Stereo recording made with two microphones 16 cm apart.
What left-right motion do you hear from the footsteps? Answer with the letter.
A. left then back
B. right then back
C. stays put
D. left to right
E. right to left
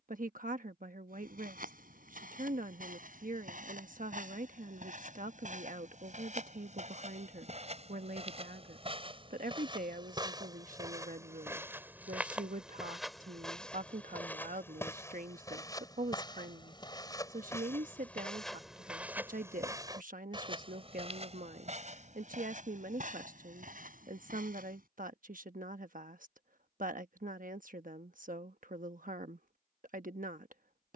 A.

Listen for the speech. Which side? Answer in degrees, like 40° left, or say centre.
60° right.